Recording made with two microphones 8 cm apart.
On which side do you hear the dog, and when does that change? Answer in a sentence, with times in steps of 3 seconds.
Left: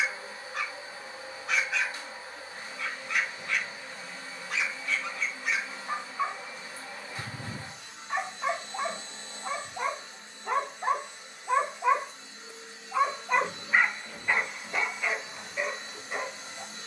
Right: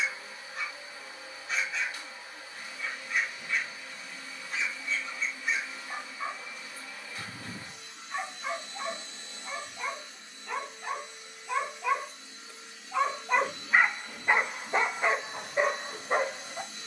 You can hear the dog on the left from 0 s, in the centre from 12 s and on the right from 15 s.